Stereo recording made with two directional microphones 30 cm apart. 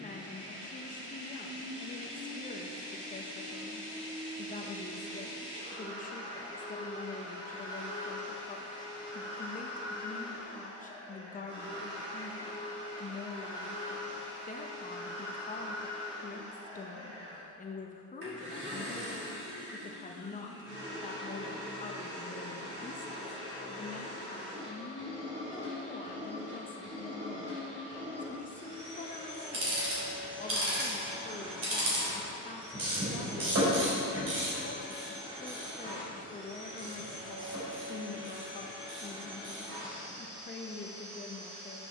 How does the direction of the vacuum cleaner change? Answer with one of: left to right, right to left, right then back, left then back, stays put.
stays put.